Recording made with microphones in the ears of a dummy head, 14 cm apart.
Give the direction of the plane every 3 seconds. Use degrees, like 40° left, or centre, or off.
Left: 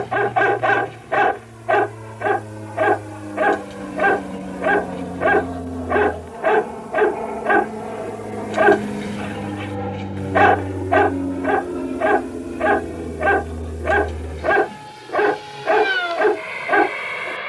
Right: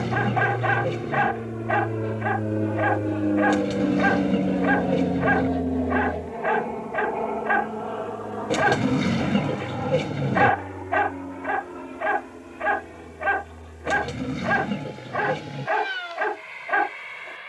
60° right, 30° right, centre, 30° left, 50° left, 60° left.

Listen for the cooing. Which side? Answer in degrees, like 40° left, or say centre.
70° right.